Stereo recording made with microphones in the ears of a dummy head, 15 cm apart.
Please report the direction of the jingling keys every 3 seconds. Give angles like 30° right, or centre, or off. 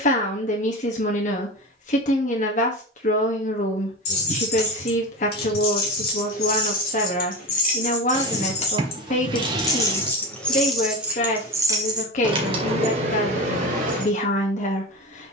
off, 70° left, 50° left, centre, 40° right.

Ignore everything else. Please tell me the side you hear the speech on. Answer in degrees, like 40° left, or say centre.
50° left.